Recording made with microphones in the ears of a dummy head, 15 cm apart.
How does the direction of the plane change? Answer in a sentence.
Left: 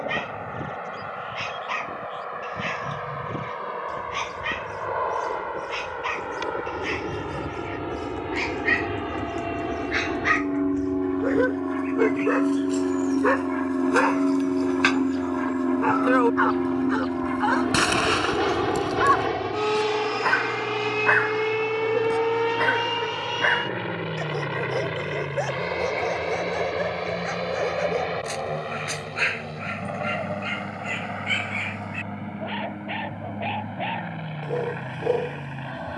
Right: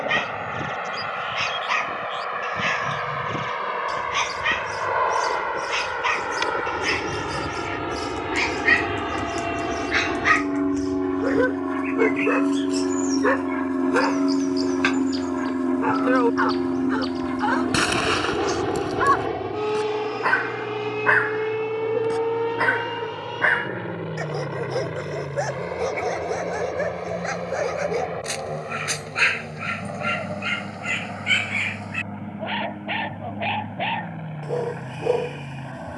In this clip you hear the plane go from the right side to the left.